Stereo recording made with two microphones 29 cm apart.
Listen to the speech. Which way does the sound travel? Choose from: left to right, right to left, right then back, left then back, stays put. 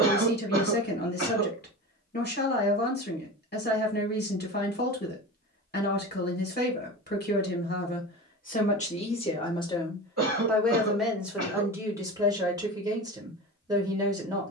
left to right.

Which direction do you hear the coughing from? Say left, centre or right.
right.